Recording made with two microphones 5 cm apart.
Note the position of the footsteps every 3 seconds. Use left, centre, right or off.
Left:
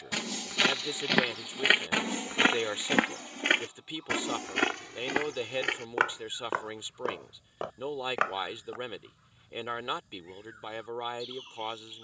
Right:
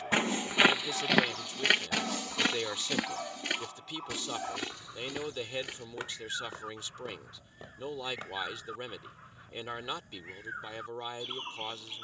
centre, left, left, off.